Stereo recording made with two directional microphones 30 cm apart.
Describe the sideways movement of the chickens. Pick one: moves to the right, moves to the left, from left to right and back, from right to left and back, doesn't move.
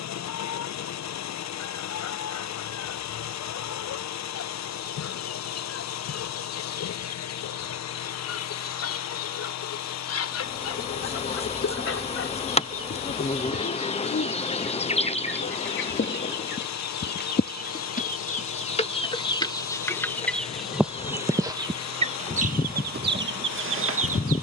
moves to the right.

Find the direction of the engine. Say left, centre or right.
left.